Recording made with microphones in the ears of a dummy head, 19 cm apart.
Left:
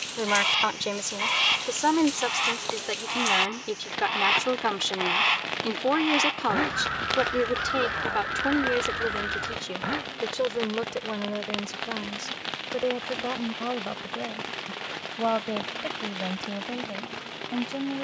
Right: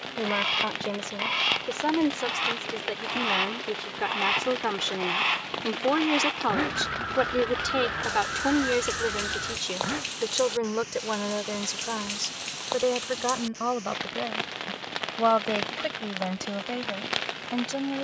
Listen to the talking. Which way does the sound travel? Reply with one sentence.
In this clip you hear the talking move from left to right.